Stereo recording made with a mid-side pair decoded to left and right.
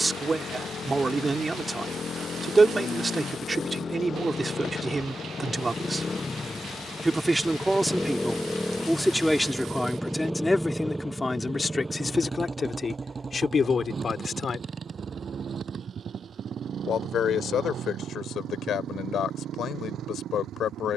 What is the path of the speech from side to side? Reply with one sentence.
You can hear the speech travel towards the left.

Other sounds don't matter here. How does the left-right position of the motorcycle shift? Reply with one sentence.
You can hear the motorcycle travel towards the right.